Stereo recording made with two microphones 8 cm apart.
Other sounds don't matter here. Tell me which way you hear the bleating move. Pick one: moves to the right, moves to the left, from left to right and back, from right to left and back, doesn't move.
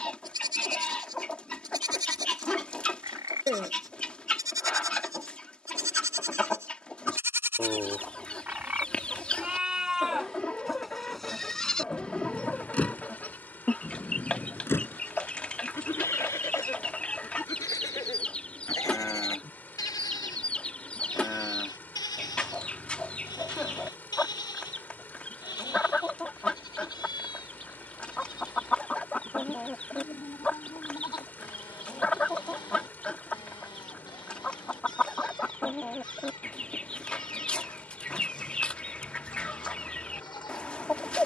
moves to the left.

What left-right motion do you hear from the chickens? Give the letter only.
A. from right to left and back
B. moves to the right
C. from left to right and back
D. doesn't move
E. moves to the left
D.